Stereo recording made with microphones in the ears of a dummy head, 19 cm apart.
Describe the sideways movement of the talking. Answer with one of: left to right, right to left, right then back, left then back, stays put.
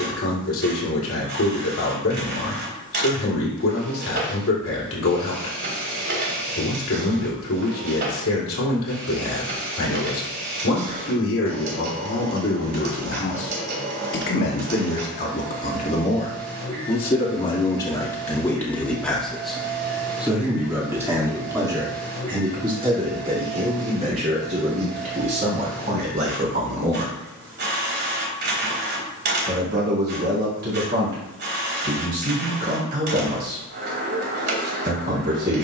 left to right.